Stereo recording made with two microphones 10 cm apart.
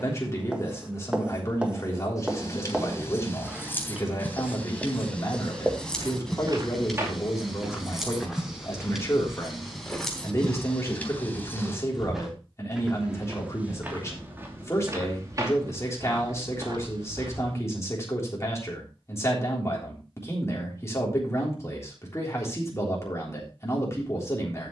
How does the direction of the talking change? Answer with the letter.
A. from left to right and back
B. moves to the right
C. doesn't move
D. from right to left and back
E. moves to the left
C.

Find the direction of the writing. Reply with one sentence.
You can hear the writing in the centre.